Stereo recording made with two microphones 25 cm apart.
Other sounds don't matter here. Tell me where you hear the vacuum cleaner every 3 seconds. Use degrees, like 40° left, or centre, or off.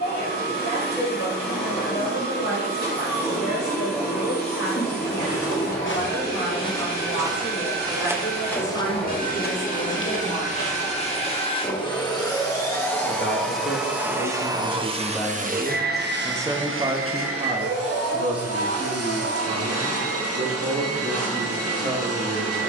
40° left, 40° left, 40° left, 30° left, centre, 50° right, 70° right, 70° right.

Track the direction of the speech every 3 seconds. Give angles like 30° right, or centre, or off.
80° left, 80° left, 70° left, 70° left, 30° left, 10° right, 50° right, 60° right.